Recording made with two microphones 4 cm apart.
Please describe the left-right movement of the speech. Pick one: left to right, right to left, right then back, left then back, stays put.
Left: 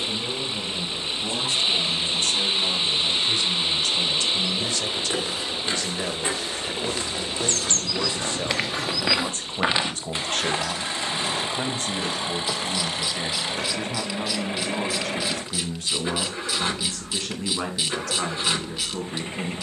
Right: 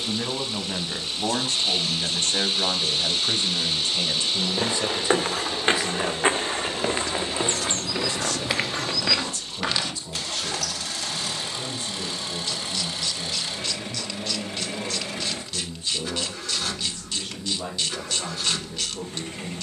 right to left.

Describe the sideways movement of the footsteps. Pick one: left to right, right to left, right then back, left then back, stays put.
right to left.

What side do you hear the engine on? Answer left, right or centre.
left.